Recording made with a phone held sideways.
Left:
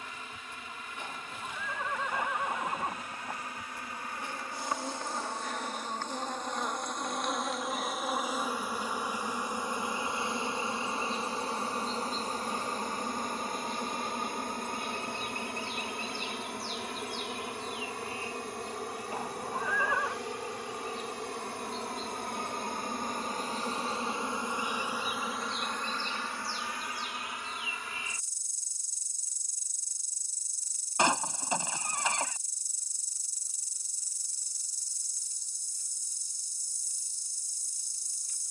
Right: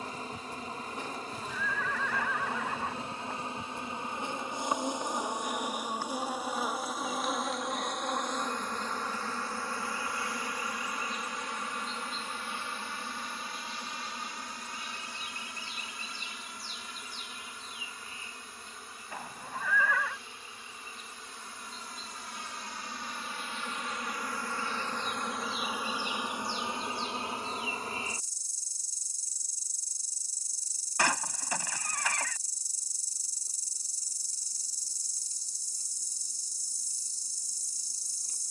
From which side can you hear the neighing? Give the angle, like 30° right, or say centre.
20° left.